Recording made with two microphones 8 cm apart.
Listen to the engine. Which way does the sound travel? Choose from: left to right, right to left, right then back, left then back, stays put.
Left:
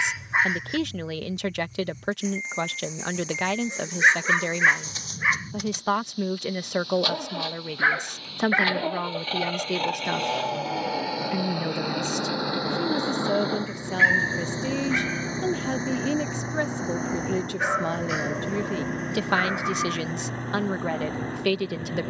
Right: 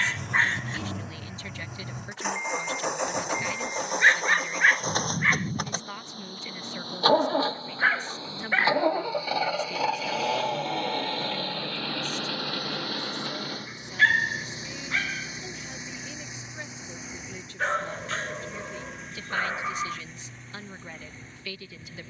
right to left.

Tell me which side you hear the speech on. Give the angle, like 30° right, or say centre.
70° left.